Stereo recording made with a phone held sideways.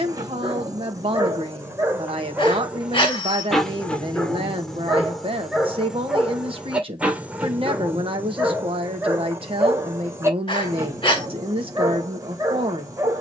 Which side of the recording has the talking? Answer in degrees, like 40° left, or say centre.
40° right.